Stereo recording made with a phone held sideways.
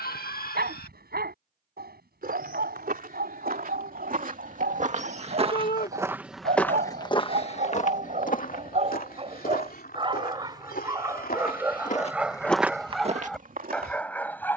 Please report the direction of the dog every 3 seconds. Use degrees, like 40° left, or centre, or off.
80° right, 80° right, 60° right, 30° right, centre.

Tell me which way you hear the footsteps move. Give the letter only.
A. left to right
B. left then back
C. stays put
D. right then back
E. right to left
B.